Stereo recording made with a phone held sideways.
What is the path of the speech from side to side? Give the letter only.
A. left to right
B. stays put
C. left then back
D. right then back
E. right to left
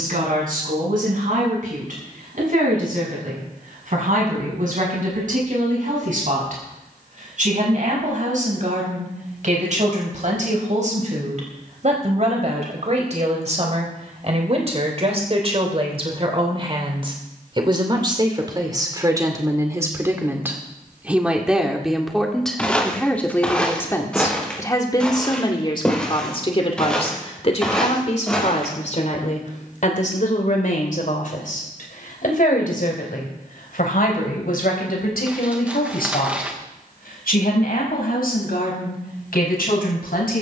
E.